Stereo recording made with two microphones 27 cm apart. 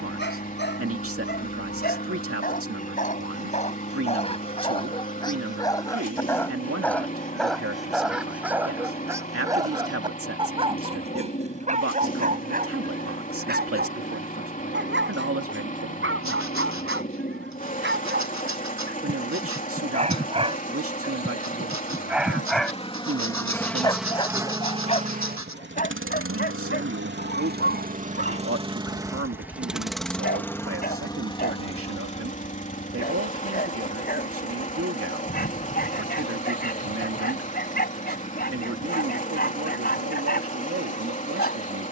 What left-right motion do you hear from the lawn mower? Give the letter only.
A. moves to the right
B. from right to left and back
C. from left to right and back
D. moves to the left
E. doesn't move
C.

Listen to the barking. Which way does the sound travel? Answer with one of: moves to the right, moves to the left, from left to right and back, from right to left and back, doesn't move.
from left to right and back.